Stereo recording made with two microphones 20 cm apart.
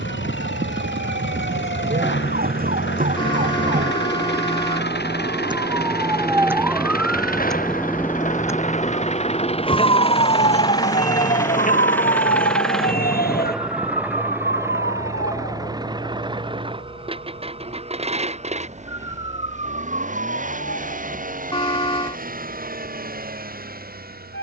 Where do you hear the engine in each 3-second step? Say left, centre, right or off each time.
left, left, left, left, centre, right, right, right.